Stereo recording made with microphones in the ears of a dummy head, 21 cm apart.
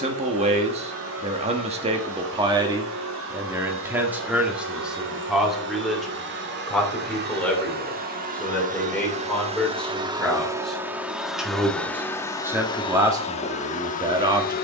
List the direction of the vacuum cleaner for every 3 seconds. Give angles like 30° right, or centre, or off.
60° right, 60° right, 40° right, 10° right, 30° left.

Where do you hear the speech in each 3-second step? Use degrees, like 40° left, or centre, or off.
20° right, centre, 10° left, centre, 20° right.